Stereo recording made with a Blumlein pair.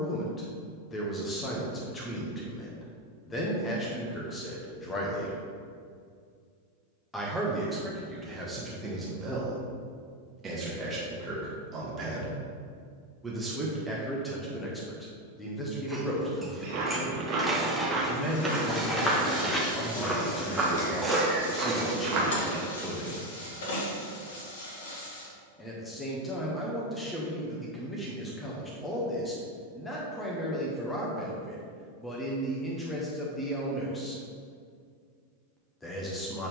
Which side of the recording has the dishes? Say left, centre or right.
centre.